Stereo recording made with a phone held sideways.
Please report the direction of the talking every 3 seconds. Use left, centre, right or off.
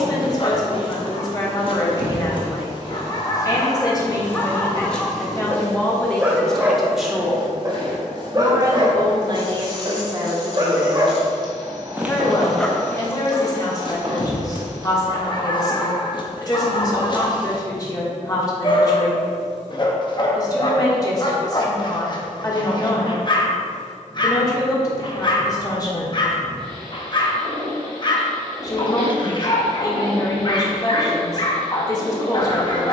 left, left, centre, right, left, left, left, left, left, left, left.